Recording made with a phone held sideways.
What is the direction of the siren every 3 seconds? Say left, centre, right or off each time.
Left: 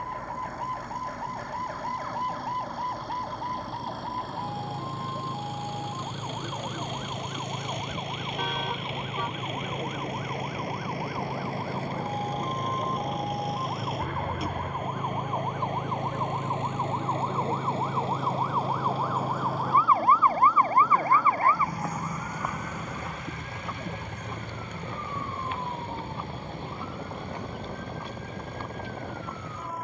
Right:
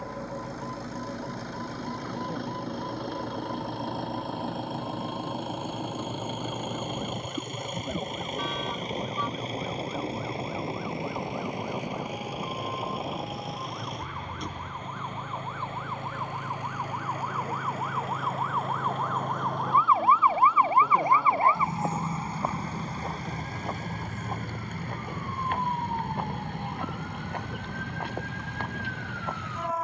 left, left, left, left, left, left, centre, right, right, right.